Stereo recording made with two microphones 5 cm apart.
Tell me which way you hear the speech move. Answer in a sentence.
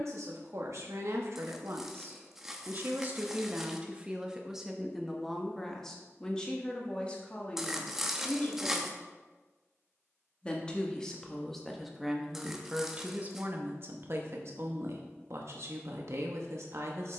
In this clip you hear the speech move from right to left and back again.